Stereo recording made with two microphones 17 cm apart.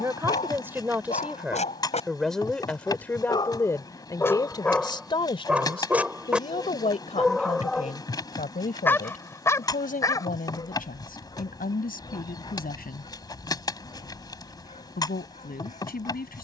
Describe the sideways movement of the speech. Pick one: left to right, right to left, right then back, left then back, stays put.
right to left.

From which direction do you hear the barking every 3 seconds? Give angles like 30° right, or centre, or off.
50° left, 10° left, centre, 20° left, 40° left, 50° left.